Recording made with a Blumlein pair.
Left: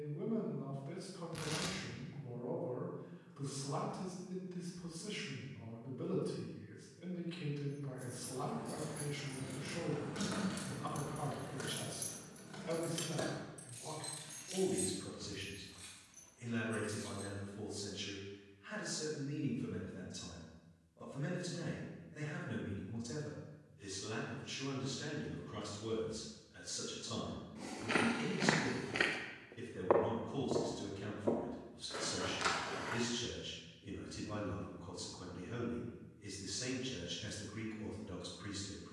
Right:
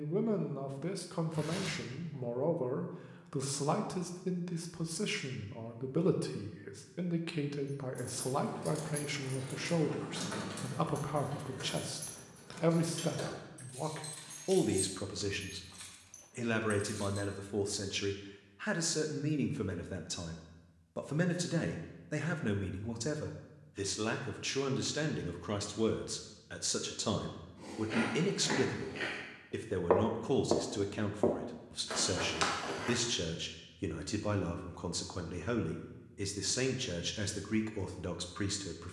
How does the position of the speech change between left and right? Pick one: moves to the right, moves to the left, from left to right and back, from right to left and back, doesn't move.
doesn't move.